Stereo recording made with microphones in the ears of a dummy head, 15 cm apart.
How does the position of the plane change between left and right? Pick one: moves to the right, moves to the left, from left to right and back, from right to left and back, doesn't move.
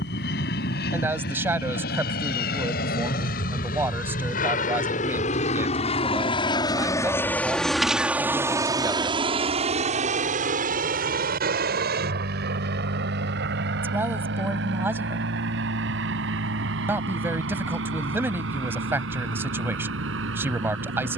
moves to the right.